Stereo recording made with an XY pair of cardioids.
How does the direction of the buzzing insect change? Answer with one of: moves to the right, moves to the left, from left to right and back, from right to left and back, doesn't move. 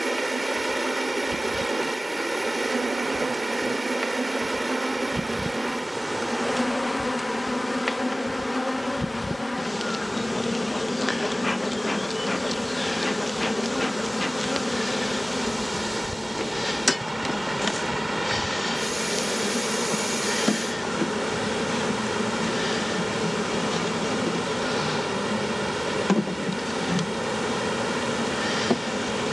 moves to the left.